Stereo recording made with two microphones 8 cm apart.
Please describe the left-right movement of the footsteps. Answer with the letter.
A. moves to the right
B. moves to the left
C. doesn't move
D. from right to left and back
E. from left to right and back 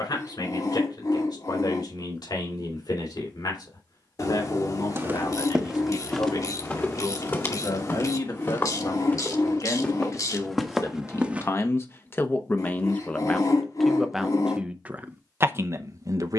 D.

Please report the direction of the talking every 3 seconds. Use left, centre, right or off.
left, left, left, left, centre, right.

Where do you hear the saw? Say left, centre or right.
left.